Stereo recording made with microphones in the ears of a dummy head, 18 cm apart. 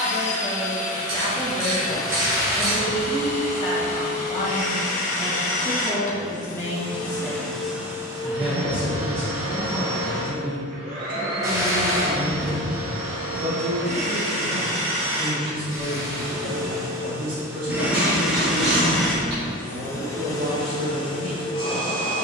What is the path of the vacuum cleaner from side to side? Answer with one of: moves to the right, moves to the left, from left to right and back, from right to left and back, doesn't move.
from left to right and back.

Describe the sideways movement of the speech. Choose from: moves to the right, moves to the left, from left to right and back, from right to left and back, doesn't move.
moves to the right.